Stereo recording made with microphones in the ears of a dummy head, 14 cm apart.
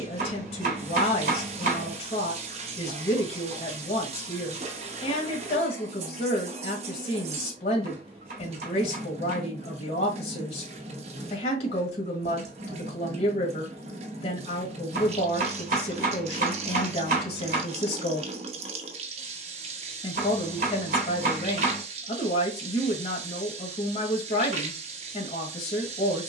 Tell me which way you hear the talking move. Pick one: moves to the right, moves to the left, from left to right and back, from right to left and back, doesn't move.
doesn't move.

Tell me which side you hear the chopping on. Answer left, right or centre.
right.